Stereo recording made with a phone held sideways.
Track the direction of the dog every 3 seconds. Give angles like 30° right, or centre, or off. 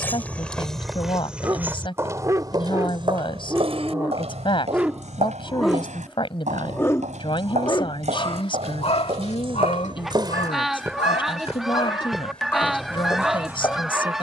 30° right, 10° right, 40° left, 60° left, centre.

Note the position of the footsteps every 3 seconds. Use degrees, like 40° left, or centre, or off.
10° right, 60° right, 70° right, 30° right, 20° left.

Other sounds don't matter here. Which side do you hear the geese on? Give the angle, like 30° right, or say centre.
centre.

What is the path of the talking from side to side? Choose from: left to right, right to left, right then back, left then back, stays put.
stays put.